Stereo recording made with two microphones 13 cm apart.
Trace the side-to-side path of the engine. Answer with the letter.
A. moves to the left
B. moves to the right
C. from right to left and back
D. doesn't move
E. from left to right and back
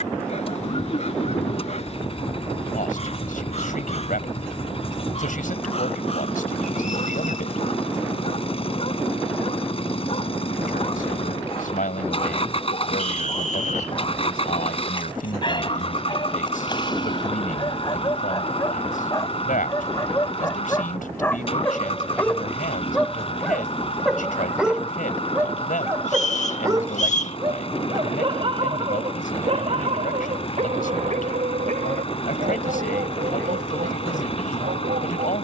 D.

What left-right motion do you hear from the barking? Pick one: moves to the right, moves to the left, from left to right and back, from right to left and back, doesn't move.
moves to the right.